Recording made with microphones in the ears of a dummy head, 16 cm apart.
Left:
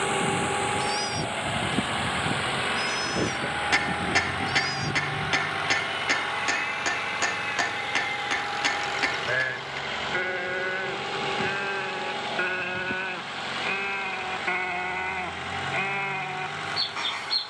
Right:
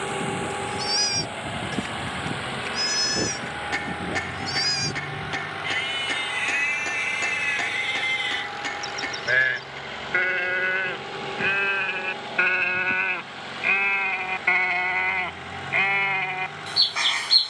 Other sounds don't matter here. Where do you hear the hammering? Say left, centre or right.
left.